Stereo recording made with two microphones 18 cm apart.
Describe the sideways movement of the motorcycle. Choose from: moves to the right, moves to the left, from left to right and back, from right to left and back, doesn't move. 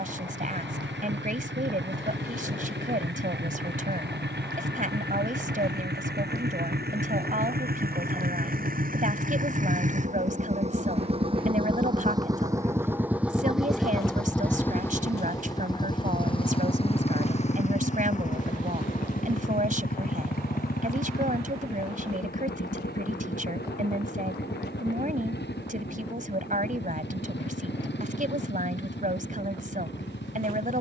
moves to the left.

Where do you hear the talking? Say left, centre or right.
right.